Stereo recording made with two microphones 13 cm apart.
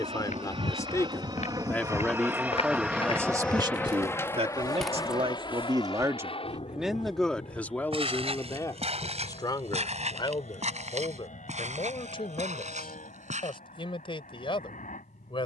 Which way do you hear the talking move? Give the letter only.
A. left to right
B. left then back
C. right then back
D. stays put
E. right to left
C.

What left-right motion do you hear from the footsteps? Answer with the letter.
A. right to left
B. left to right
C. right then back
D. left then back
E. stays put
B.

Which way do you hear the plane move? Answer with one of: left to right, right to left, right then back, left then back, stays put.
right to left.